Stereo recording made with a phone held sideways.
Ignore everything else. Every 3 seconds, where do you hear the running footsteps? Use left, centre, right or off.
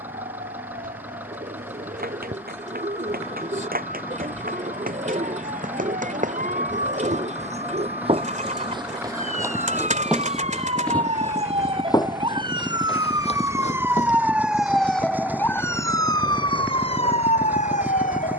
right, right, right, centre, left, off.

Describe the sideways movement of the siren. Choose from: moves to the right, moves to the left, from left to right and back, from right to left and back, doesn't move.
moves to the left.